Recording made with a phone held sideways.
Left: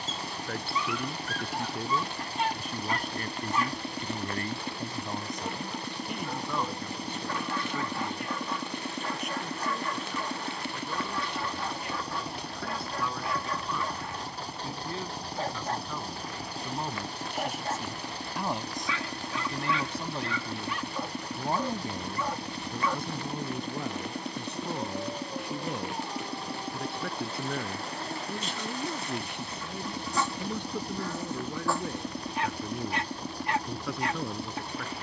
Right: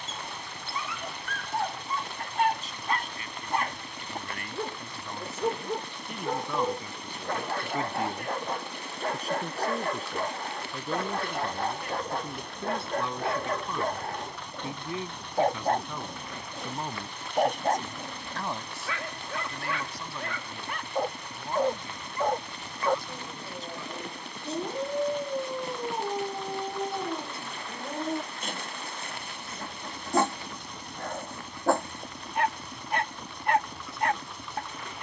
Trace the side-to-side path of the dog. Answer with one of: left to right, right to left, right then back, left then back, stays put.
stays put.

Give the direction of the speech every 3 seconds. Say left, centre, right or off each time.
left, left, centre, right, right, centre, left, left, left, left, left, left.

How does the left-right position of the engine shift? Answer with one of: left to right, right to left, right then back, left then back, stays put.
stays put.